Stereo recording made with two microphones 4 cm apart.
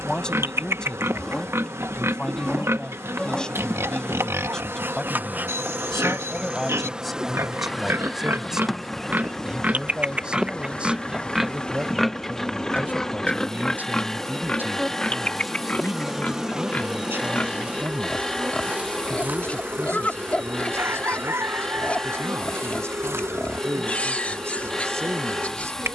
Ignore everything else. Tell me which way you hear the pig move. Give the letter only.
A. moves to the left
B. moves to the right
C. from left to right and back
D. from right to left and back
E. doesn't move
A.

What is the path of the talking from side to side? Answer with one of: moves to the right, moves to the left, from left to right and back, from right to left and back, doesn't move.
moves to the right.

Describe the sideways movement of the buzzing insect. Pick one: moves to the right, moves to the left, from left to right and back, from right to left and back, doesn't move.
from right to left and back.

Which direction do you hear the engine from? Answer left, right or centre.
centre.